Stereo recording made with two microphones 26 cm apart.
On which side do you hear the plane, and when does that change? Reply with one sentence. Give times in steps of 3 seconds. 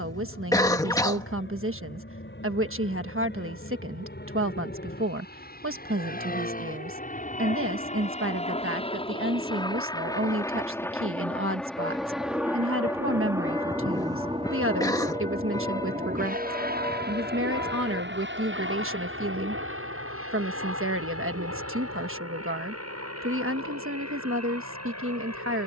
In this clip you hear the plane on the left from 0 s, in the centre from 9 s and on the right from 15 s.